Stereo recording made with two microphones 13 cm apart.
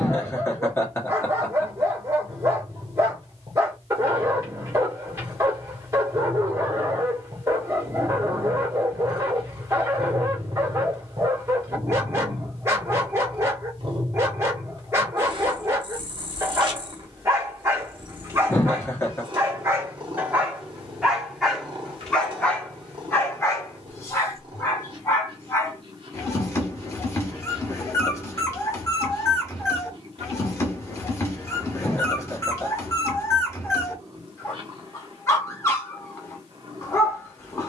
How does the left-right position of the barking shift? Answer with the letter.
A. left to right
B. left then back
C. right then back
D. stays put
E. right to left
E.